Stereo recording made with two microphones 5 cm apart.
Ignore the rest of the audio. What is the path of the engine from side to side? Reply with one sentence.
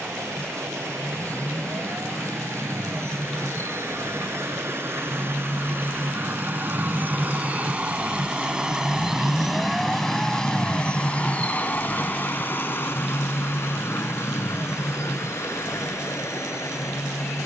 You can hear the engine move to the left.